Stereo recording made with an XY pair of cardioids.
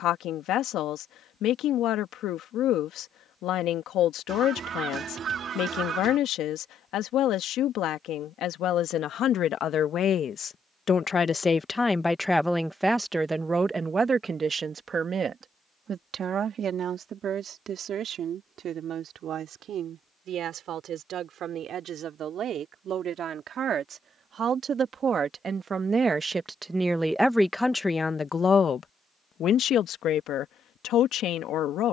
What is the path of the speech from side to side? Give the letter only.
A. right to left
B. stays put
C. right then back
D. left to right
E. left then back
C.